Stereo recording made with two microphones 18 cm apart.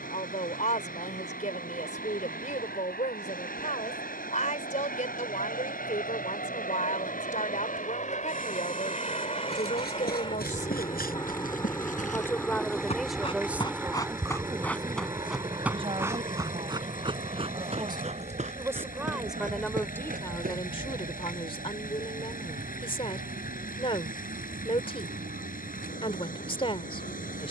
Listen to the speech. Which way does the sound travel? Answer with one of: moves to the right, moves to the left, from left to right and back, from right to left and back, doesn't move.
from left to right and back.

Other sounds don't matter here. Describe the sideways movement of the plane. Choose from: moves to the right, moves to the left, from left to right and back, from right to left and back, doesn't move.
moves to the right.